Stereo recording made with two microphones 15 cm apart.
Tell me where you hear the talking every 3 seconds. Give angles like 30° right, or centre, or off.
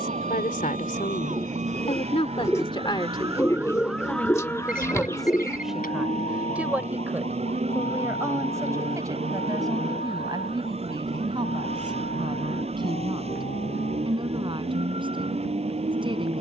50° left, 10° left, 10° right, 30° right, 30° right, 30° right.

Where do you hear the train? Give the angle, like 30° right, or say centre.
40° right.